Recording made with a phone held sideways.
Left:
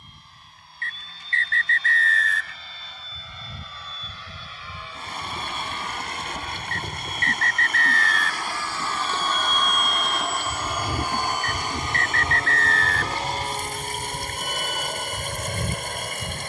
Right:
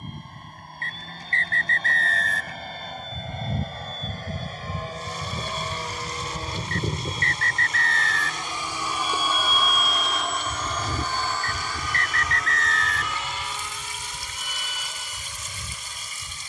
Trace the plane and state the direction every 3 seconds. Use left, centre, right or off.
right, right, right, centre, left, left.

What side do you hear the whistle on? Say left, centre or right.
right.